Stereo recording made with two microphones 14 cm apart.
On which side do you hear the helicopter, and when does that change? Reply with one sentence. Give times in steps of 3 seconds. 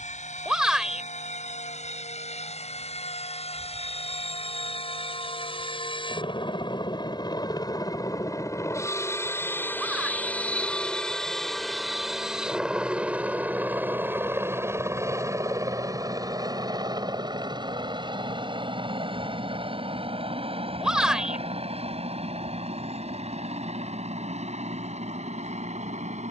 In this clip you hear the helicopter on the left from 0 s, in the centre from 9 s and on the right from 15 s.